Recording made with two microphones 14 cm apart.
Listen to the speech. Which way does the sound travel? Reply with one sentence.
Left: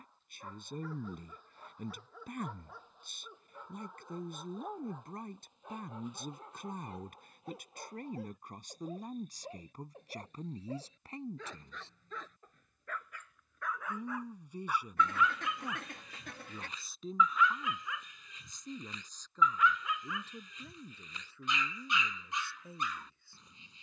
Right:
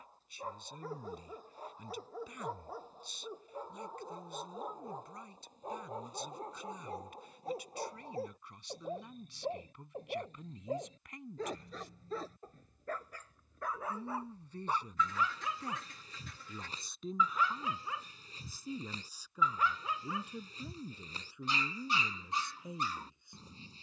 In this clip you hear the speech move to the right.